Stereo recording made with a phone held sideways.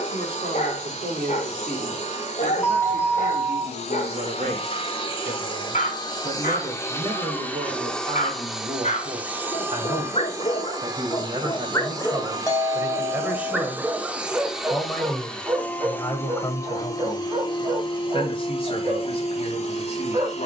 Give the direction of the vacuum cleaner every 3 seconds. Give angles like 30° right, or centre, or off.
50° left, 40° left, 10° left, 20° right, 20° right, 20° left, 50° left.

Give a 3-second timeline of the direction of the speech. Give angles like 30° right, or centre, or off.
70° right, 60° right, 50° right, 40° right, 10° right, 20° left, 40° left.